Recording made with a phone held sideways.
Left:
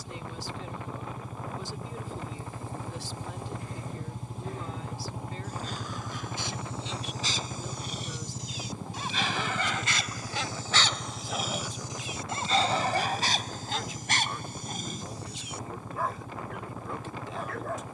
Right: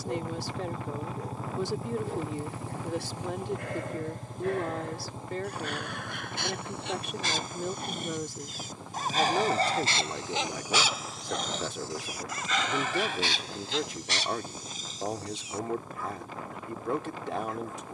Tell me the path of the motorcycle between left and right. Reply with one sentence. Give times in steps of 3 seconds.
In this clip you hear the motorcycle on the right from 0 s, in the centre from 3 s and on the left from 6 s.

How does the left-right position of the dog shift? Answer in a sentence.
You can hear the dog move to the left.